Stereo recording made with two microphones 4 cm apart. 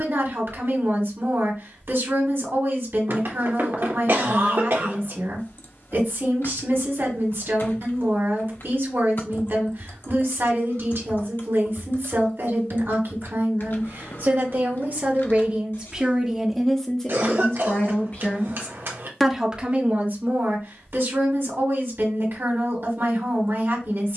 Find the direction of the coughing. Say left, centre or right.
right.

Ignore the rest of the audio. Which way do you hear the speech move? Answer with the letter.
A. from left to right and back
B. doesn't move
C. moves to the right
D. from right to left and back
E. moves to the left
D.